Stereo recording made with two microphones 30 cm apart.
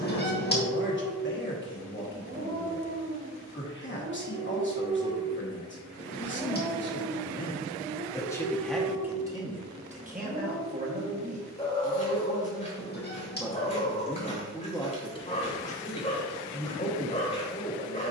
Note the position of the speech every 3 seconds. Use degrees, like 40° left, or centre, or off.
40° left, 40° left, 20° left, 20° right, centre, 30° left.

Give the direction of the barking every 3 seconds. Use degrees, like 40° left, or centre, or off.
50° right, 30° right, 10° right, 20° left, 20° left, 20° left.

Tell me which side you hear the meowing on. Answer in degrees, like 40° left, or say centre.
30° left.